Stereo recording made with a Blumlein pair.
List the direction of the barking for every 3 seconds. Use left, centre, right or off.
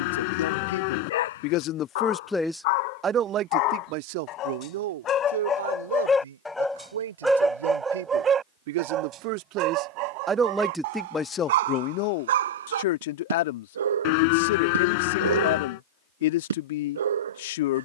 left, left, centre, right, right, right.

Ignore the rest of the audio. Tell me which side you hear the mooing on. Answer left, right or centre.
left.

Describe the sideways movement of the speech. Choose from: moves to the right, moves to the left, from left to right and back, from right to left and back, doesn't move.
from left to right and back.